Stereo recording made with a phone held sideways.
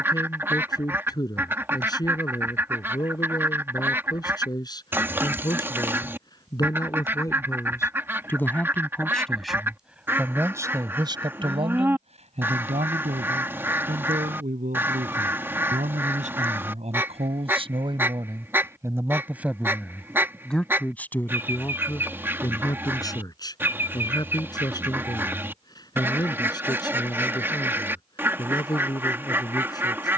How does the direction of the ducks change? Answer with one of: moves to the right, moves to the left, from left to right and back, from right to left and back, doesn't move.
doesn't move.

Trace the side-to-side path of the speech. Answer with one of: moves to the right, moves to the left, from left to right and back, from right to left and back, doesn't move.
from left to right and back.